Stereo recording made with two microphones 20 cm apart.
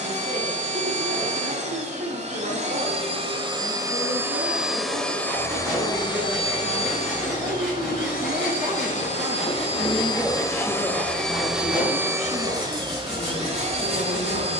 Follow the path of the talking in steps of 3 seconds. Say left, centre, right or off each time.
right, right, right, centre, left.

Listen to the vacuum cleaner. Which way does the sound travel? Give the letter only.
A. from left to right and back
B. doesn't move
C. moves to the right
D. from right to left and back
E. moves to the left
D.